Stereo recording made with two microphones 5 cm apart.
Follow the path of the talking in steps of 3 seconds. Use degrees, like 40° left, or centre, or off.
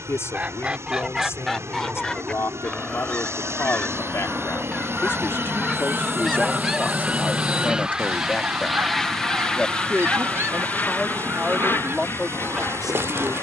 60° left, 50° left, 30° left, centre, 10° right.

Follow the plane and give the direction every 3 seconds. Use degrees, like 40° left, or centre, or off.
70° right, 50° right, 20° right, 30° left, 50° left.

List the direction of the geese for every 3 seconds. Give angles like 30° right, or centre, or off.
centre, 20° left, 20° right, 50° right, 50° right.